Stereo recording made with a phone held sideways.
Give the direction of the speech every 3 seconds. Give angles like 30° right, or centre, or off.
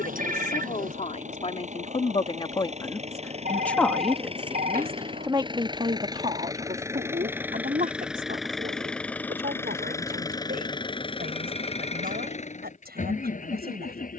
40° left, 10° right, 50° right, 70° right, 80° right.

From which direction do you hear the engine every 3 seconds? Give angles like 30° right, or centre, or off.
50° right, 40° right, 10° right, 20° left, 50° left.